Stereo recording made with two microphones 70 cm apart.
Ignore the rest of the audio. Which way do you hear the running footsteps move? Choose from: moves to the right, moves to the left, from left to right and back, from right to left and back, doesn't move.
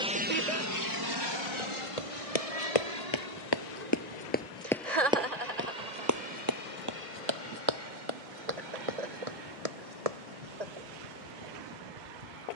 moves to the right.